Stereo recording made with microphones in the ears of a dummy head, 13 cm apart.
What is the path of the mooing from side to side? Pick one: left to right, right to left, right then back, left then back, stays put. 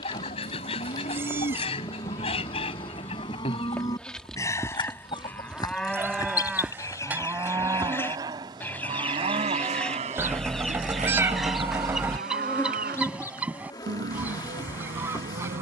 left to right.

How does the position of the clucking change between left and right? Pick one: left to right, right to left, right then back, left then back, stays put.
left to right.